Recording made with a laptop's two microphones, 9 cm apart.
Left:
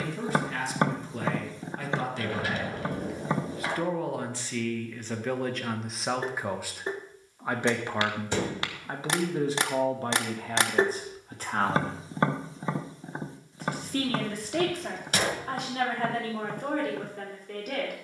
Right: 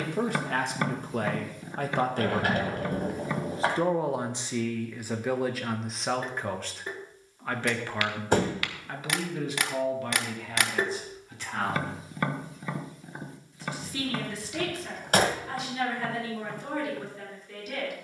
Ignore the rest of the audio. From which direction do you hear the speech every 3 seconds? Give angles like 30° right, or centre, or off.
50° right, 10° right, 10° left, 40° left, 50° left, 50° left.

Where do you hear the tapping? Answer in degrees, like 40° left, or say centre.
30° left.